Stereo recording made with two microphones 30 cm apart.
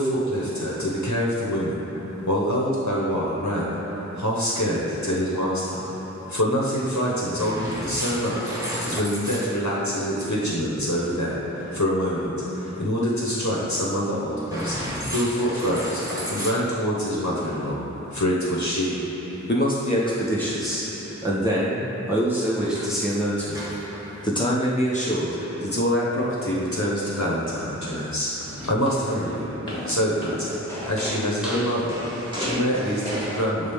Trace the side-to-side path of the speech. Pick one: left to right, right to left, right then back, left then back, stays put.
right then back.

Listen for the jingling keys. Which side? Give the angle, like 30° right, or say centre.
10° right.